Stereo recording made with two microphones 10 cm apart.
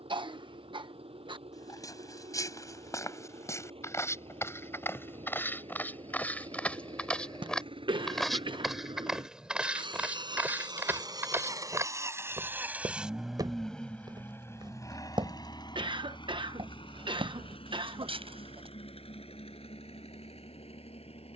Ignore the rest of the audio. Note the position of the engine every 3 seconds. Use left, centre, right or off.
right, right, right, right, centre, left, left.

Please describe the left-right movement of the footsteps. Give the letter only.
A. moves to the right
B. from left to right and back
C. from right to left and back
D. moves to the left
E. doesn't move
A.